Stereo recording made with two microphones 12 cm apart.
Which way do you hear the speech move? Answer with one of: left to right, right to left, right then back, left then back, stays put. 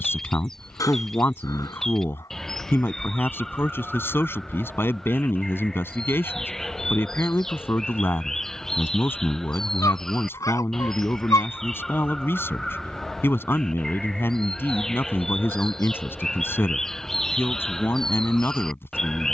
stays put.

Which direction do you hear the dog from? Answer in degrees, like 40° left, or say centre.
30° left.